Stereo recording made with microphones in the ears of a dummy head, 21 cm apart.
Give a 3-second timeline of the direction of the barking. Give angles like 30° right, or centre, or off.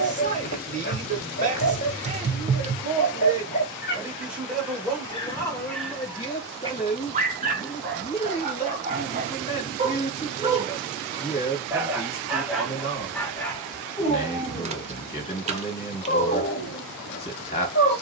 40° left, 30° left, 30° right, 20° right, 10° left, 30° left.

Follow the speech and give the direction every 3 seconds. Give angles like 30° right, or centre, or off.
30° right, centre, 30° left, 30° left, 30° left, 30° left.